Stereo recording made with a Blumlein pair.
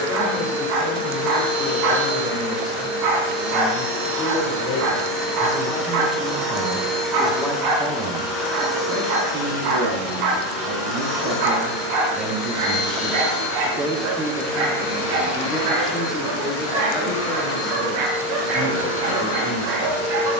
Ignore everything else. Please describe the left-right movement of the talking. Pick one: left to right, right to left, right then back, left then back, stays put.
right then back.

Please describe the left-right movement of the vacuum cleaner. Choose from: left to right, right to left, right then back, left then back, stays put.
right to left.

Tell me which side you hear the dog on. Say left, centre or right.
right.